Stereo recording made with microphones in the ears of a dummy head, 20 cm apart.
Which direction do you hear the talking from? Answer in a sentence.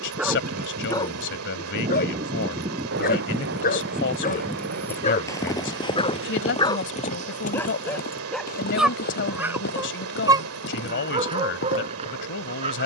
You can hear the talking on the left.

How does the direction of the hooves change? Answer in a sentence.
In this clip you hear the hooves move from right to left.